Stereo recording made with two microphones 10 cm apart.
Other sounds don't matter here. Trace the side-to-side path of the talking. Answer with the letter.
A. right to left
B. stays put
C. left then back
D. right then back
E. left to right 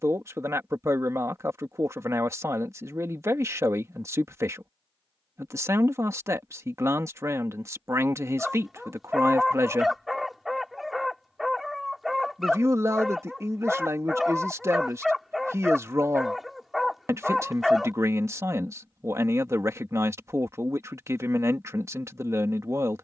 B.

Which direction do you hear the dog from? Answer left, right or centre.
centre.